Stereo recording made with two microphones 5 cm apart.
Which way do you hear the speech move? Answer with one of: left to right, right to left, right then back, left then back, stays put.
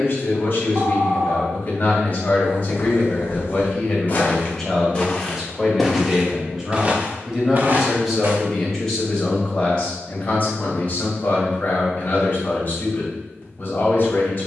right then back.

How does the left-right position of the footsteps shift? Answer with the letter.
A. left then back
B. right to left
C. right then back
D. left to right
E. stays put
D.